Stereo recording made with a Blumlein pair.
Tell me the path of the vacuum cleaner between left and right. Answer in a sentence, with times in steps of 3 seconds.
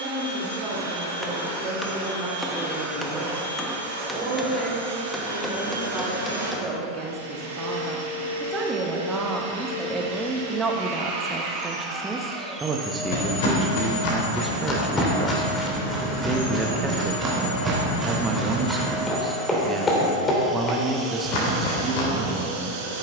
In this clip you hear the vacuum cleaner on the right from 0 s, in the centre from 12 s, on the left from 15 s, in the centre from 18 s and on the right from 21 s.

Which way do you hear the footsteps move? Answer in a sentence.
In this clip you hear the footsteps go right and come back.